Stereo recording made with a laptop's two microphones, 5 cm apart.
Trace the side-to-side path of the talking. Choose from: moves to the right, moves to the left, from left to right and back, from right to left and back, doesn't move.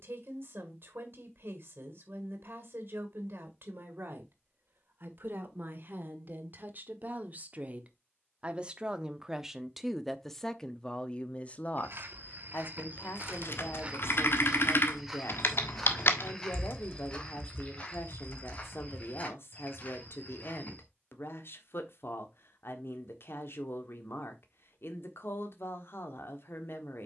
moves to the left.